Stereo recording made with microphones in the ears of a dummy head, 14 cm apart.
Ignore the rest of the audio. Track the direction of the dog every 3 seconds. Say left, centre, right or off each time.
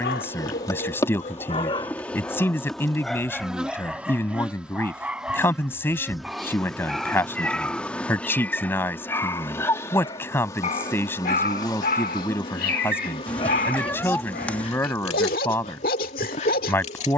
left, centre, centre, left, left, left.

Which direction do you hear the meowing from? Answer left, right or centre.
centre.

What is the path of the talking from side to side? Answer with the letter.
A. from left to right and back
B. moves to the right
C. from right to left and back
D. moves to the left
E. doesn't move
E.